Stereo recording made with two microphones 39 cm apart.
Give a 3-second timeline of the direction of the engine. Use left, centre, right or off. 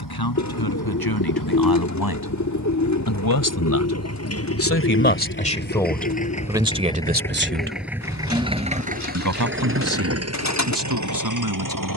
left, left, centre, right.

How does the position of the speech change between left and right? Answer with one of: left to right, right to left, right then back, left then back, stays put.
left to right.